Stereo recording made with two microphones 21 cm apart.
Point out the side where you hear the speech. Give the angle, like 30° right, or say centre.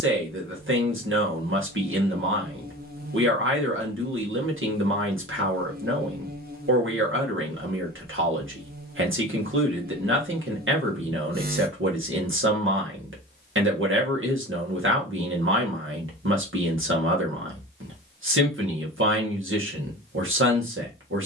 70° right.